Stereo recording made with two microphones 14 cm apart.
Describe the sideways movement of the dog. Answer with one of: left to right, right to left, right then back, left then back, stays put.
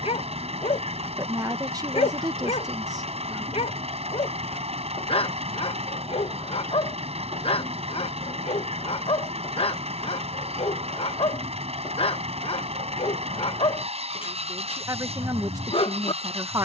stays put.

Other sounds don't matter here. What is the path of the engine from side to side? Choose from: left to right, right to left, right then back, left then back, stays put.
stays put.